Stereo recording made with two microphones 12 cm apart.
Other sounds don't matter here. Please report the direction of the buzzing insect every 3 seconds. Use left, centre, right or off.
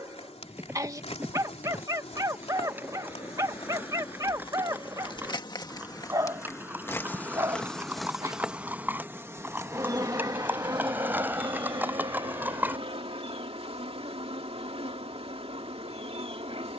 left, left, centre, right, right, right.